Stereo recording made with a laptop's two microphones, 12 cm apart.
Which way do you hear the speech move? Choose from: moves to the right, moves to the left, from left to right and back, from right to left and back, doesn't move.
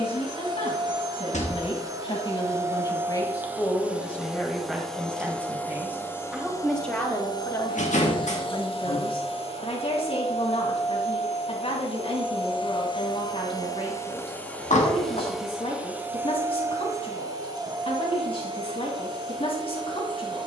from left to right and back.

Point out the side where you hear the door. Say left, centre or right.
left.